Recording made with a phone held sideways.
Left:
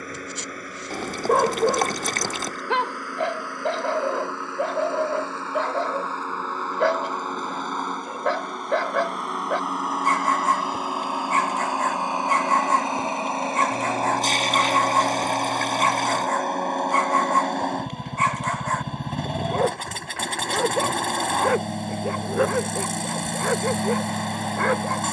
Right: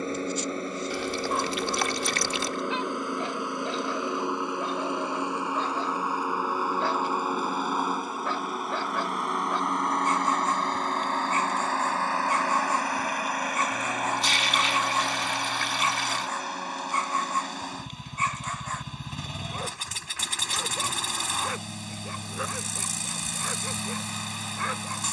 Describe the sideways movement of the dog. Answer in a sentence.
In this clip you hear the dog stay put.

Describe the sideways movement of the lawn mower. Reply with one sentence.
You can hear the lawn mower move to the left.